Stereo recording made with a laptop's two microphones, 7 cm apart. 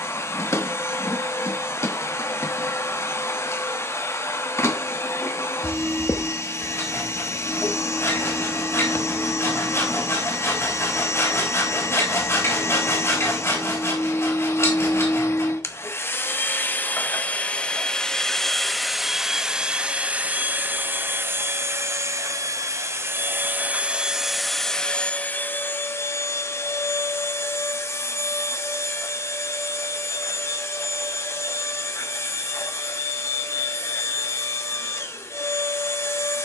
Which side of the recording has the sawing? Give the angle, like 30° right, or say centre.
40° left.